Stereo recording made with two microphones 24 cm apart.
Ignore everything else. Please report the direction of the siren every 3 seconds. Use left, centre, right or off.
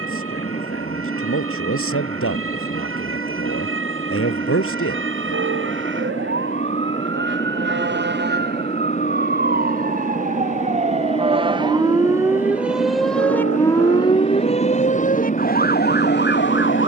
right, right, right, right, centre, left.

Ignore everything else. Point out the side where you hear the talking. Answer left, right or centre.
left.